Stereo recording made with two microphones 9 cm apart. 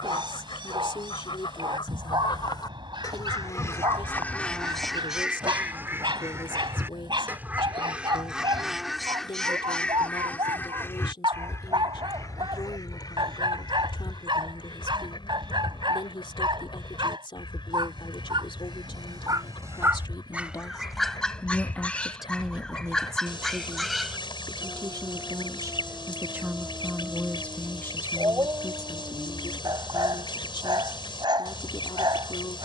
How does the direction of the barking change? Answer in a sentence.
In this clip you hear the barking move from right to left and back again.